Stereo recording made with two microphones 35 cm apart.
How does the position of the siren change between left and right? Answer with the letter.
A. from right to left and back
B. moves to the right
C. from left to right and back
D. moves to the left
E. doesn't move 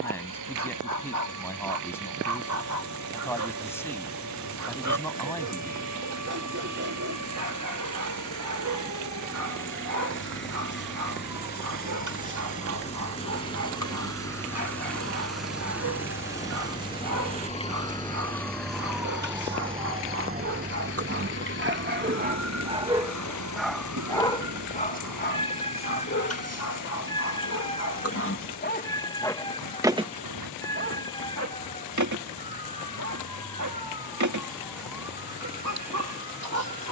B.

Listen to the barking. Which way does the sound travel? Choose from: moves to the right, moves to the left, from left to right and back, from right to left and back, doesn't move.
from right to left and back.